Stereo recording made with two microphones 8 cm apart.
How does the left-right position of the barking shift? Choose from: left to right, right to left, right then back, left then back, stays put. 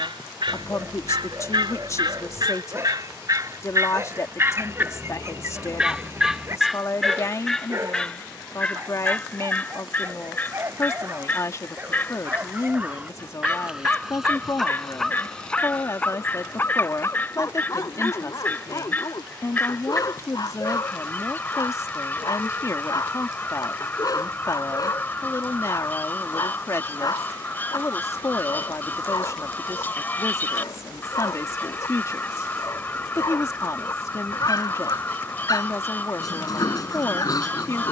right to left.